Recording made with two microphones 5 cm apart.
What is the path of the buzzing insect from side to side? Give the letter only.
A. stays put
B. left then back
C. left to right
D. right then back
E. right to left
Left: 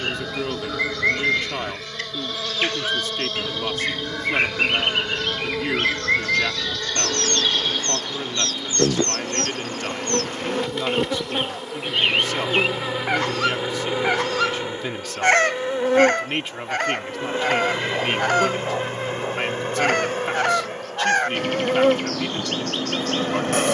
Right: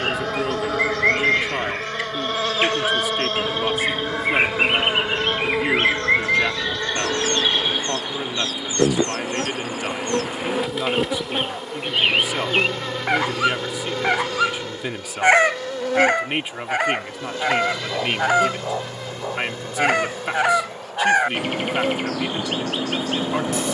E.